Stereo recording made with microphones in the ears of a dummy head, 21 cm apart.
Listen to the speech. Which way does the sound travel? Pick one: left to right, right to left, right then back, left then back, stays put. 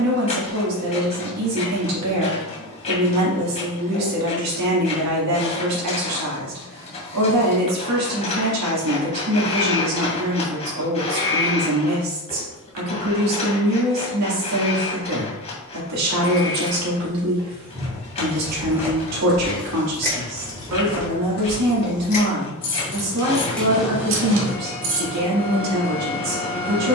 stays put.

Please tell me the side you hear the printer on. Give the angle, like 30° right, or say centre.
30° left.